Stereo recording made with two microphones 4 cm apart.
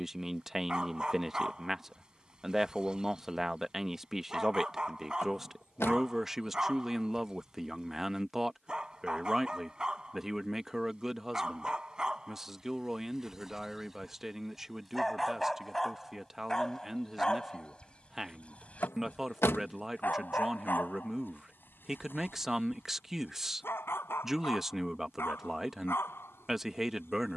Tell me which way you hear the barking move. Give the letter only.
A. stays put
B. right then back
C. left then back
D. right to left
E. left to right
D.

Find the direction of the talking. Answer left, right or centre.
centre.